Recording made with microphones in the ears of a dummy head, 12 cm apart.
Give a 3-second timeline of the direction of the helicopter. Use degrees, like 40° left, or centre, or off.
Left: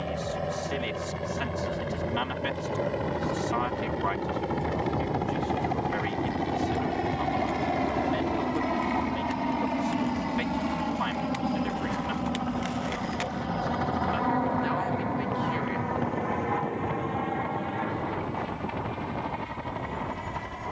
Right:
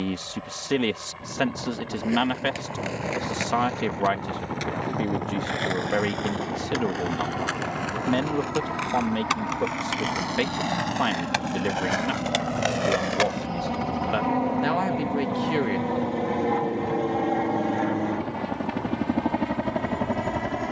50° left, 40° left, 30° left, 10° left, 10° right, 30° right, 50° right.